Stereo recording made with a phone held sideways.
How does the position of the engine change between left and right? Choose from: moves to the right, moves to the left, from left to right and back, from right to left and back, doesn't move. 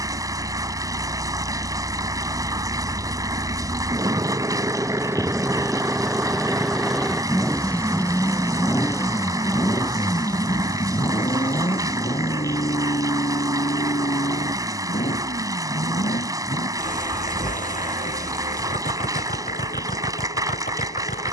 moves to the left.